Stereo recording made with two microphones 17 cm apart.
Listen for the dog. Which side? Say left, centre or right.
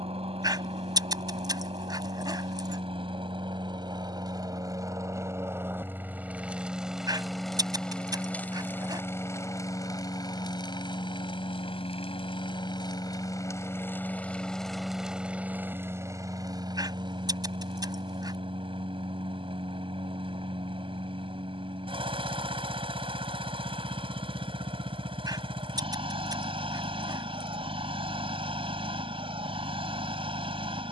right.